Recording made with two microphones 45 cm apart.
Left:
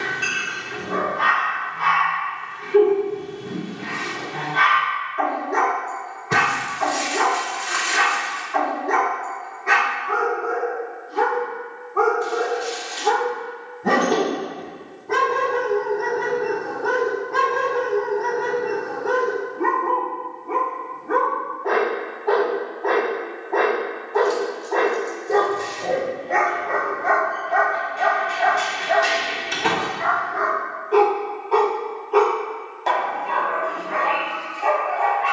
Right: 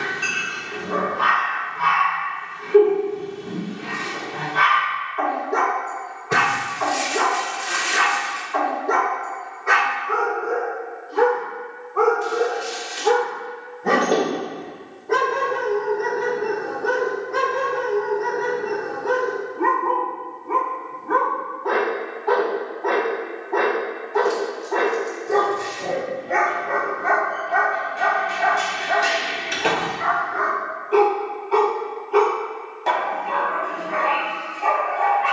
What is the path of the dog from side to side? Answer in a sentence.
You can hear the dog move from left to right.